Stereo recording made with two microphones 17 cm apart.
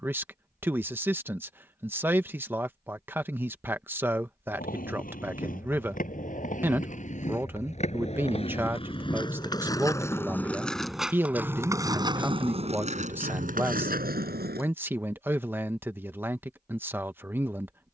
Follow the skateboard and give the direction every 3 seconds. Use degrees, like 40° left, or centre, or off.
off, 50° left, 40° left, 10° left, 50° right, off.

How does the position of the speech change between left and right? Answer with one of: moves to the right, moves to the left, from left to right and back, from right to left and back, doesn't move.
doesn't move.